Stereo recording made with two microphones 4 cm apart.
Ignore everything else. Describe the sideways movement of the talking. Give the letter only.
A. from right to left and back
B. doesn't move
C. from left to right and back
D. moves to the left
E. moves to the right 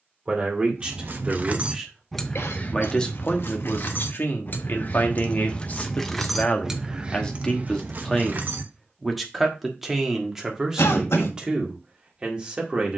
A.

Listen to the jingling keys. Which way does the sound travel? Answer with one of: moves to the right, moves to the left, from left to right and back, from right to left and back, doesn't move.
from right to left and back.